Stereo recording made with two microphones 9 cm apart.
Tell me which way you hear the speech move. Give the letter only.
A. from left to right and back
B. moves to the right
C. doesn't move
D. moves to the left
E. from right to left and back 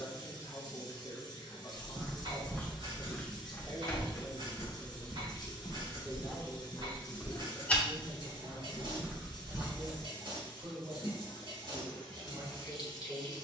B.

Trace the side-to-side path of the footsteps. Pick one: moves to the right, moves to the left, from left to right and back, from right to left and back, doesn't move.
from right to left and back.